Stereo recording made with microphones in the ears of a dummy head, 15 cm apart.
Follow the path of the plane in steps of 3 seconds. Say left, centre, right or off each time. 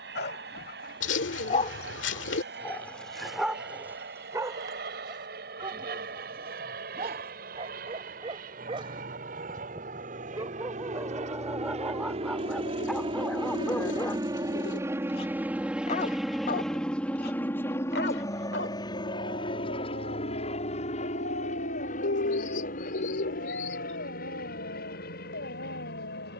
right, right, right, right, right, centre, left, left, left.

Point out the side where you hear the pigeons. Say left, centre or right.
left.